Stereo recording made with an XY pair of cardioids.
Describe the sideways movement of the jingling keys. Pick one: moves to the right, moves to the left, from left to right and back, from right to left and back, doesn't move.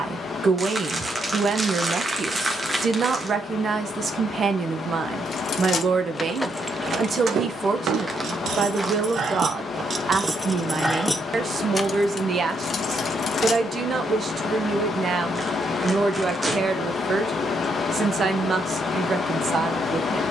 from left to right and back.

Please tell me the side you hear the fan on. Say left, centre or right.
left.